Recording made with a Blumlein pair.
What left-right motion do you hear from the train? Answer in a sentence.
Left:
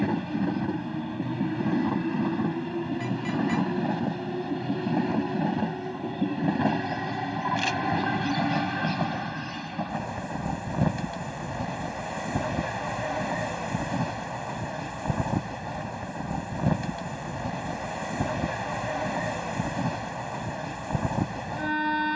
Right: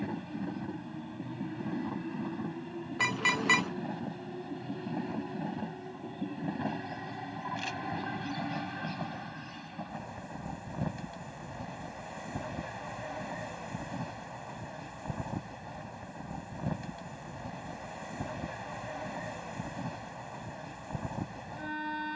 You can hear the train stay put.